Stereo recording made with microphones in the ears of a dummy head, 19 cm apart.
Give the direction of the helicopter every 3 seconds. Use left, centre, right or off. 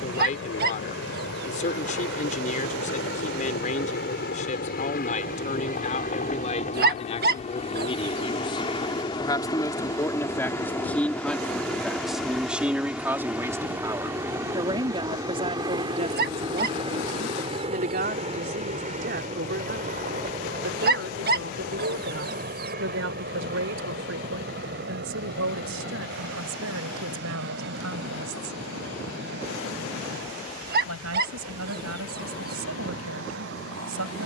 left, left, left, centre, centre, right, right, right, right, right, right, right.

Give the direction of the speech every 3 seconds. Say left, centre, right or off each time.
left, left, left, centre, centre, right, right, right, right, right, right, right.